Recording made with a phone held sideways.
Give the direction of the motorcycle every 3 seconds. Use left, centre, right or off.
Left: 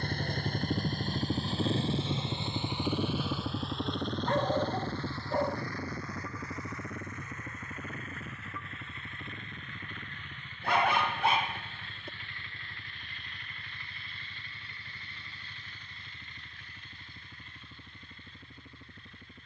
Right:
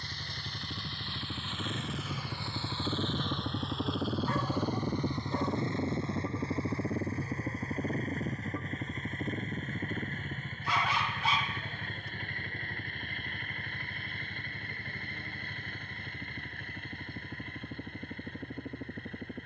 left, centre, right, right, right, right, right.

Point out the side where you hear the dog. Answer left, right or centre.
left.